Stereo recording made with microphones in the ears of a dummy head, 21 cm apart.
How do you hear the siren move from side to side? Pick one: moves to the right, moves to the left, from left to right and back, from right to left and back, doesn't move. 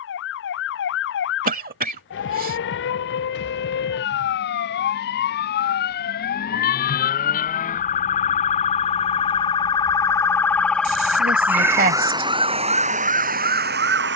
moves to the right.